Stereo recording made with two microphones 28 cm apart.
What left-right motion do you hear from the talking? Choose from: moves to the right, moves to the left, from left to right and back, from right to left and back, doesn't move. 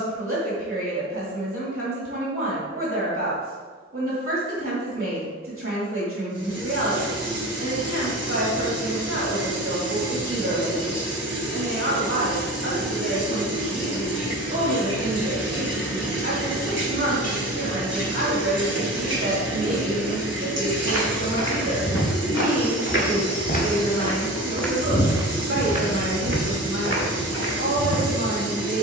doesn't move.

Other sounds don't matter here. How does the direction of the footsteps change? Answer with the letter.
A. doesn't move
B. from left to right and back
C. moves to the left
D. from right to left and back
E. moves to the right
E.